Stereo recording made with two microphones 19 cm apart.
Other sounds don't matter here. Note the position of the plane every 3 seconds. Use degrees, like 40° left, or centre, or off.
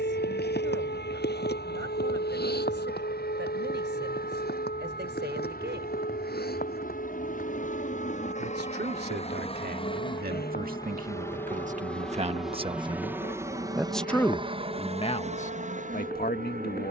70° left, 60° left, 50° left, 20° left, 20° right, 40° right.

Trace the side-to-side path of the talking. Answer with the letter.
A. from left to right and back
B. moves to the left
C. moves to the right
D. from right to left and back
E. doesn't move
B.